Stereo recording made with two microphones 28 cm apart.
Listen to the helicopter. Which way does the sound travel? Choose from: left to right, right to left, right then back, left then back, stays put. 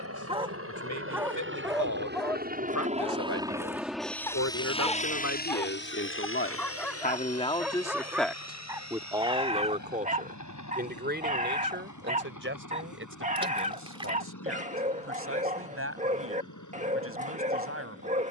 right to left.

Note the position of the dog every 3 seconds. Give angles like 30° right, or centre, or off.
10° right, 10° left, centre, 20° right, 30° right, 30° right.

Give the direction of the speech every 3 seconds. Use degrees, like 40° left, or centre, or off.
80° left, 70° left, 20° left, 30° right, 50° right, 50° right.